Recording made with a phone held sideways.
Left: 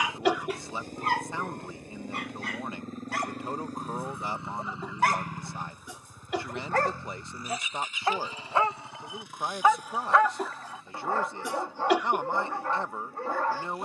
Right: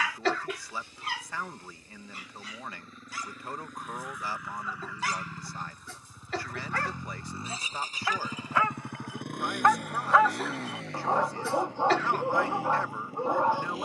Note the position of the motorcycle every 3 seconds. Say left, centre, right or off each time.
left, left, right, right, right.